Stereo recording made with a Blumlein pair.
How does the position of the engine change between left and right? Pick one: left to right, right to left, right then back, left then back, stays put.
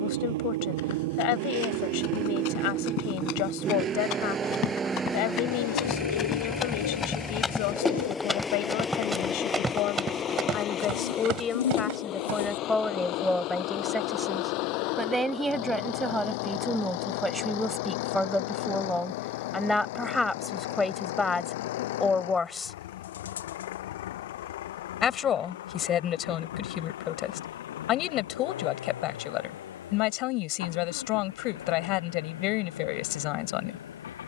right to left.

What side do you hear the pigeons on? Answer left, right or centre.
left.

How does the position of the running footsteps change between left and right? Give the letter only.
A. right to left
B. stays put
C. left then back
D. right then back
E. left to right
E.